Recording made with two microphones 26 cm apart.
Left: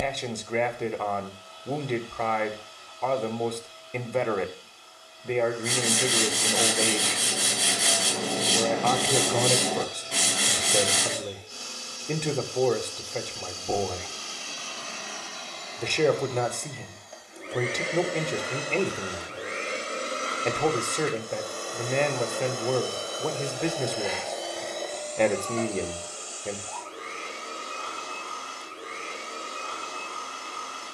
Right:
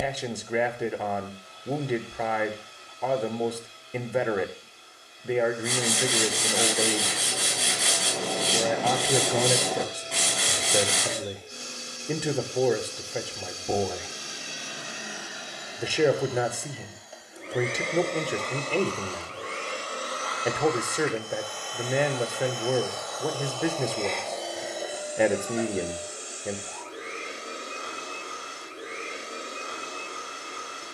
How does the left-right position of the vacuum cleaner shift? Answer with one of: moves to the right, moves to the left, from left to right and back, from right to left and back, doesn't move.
from right to left and back.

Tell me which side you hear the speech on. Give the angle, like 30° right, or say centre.
10° right.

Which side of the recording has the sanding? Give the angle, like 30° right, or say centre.
centre.